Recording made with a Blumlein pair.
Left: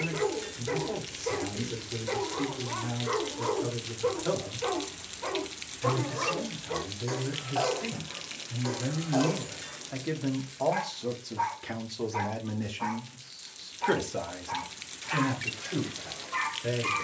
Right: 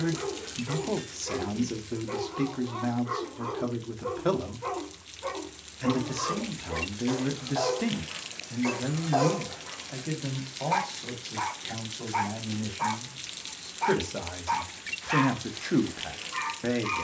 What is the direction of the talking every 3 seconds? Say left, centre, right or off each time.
right, right, right, centre, centre, right.